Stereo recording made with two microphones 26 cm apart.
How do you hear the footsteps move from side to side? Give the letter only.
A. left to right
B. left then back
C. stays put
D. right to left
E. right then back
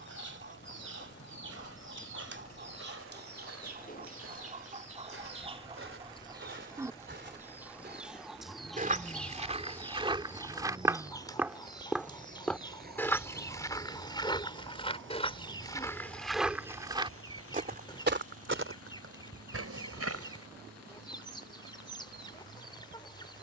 B.